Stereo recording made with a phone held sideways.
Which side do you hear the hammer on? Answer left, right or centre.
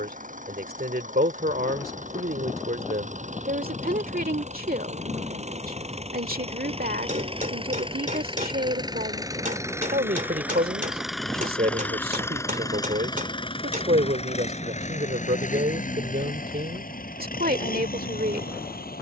right.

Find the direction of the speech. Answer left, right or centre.
right.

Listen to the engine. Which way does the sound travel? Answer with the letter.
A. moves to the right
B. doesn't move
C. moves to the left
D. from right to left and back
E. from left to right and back
C.